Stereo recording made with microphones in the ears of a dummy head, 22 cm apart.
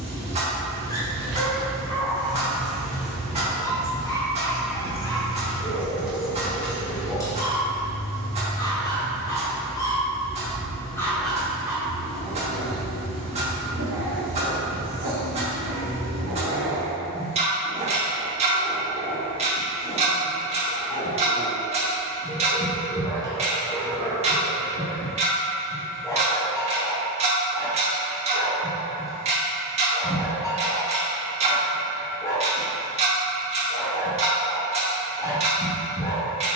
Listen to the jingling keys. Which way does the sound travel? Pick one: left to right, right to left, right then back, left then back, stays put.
right to left.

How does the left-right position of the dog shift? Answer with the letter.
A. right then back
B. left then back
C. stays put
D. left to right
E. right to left
A.